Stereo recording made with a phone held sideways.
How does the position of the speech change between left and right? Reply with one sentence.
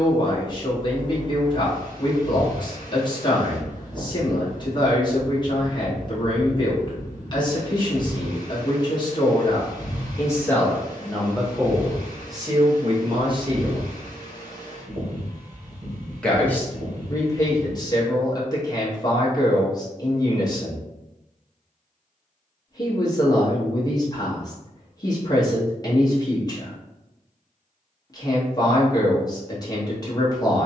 In this clip you hear the speech go right and come back.